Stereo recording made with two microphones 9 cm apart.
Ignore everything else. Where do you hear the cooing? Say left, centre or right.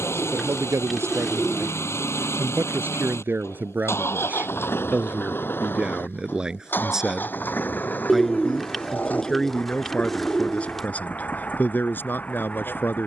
centre.